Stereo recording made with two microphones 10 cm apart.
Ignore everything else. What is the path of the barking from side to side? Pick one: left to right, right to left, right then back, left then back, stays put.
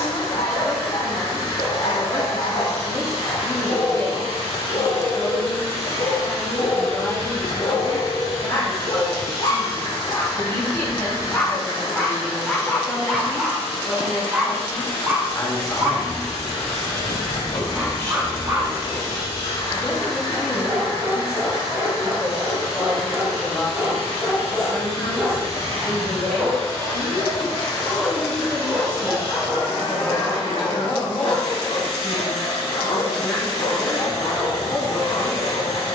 right then back.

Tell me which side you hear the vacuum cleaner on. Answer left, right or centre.
left.